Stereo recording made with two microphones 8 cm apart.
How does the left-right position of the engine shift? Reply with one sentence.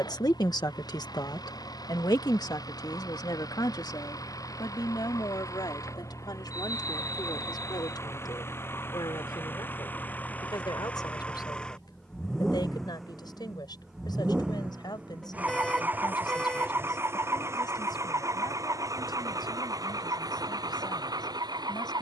You can hear the engine move to the right.